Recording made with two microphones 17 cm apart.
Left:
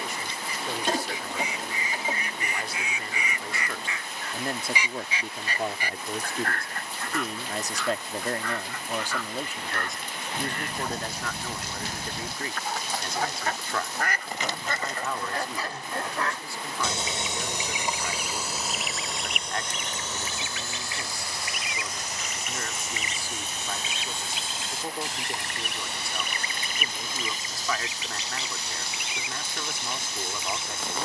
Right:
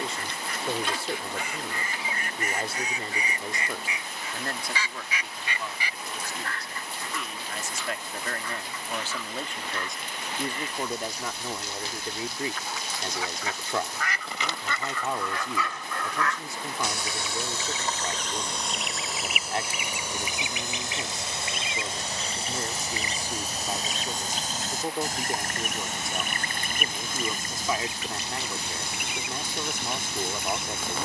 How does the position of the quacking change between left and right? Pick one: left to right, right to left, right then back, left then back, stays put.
left then back.